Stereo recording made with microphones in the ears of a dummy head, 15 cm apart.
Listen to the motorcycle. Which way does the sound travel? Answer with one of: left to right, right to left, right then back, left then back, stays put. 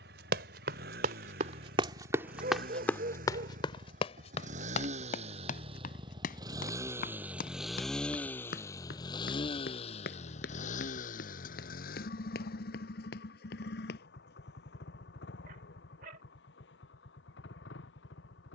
right to left.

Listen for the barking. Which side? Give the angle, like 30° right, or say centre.
50° right.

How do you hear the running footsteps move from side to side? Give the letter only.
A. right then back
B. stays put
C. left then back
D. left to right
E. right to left
E.